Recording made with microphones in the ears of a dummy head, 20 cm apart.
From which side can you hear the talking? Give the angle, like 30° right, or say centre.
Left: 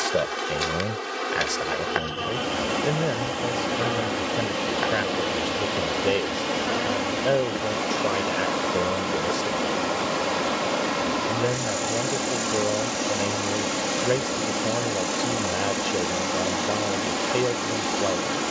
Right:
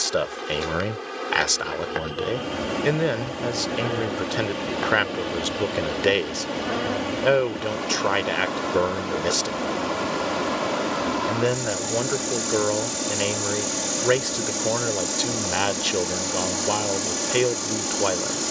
50° right.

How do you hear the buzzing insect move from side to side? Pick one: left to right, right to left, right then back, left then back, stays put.
left to right.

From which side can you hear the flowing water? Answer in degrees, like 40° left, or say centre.
20° left.